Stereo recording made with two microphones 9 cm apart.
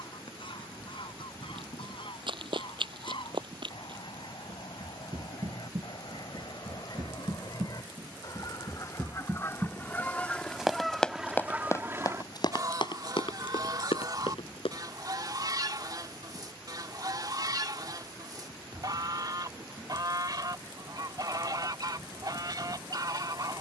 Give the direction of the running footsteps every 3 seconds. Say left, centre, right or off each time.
right, right, right, centre, left, off, off, off.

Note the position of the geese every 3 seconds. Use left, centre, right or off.
left, left, left, centre, right, right, right, right.